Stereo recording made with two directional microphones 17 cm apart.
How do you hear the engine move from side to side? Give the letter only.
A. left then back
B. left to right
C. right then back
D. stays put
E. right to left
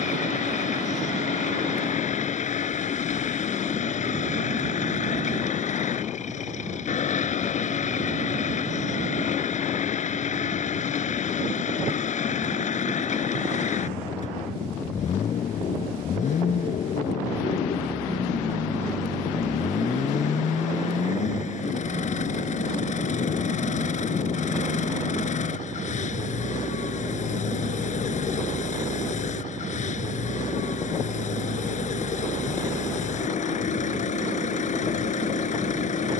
D.